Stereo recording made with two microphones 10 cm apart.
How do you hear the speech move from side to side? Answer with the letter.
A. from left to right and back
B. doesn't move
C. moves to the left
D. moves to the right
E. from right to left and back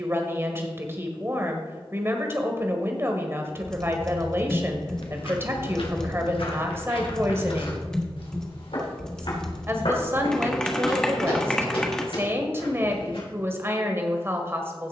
B.